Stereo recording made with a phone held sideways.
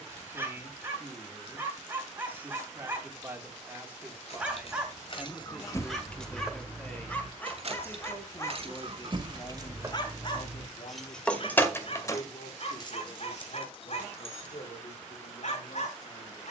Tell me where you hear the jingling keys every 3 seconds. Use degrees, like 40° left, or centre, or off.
off, 40° left, 30° right, 10° right, 40° left, off.